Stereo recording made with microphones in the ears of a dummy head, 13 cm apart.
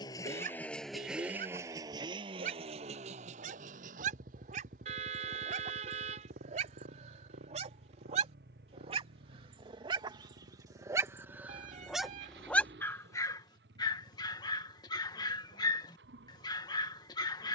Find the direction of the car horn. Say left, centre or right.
right.